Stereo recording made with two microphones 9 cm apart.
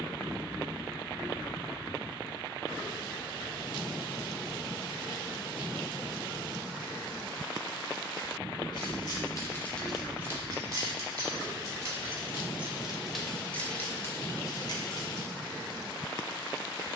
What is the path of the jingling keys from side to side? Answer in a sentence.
You can hear the jingling keys move from left to right and back again.